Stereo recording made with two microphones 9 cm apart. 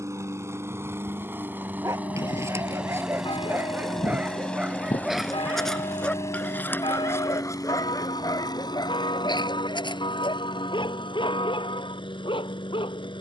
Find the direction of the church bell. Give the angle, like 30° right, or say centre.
70° left.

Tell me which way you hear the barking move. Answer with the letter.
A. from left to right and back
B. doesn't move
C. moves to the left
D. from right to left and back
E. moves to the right
C.